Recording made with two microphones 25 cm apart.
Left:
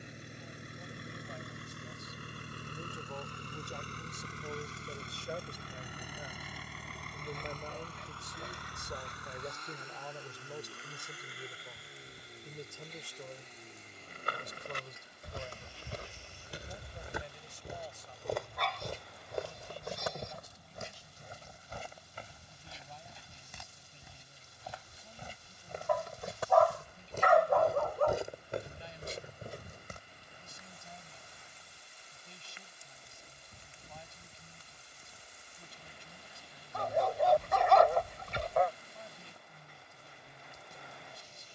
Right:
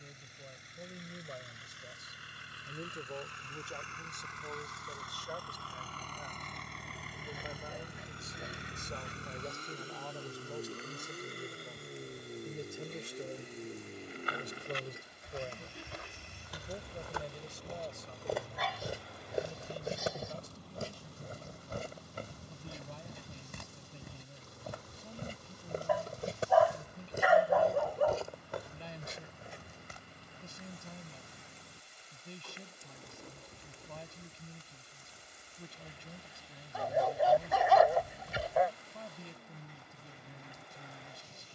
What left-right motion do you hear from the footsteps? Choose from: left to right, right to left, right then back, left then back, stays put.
right then back.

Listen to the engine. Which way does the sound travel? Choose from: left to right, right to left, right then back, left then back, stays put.
left to right.